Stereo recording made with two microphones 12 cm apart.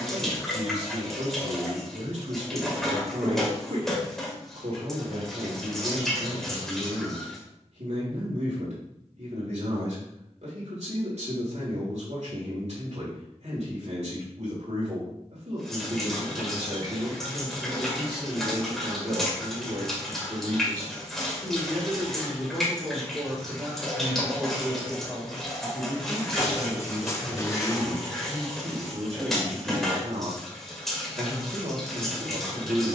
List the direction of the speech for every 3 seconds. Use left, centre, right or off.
right, right, right, right, right, right, right, centre, centre, right, right.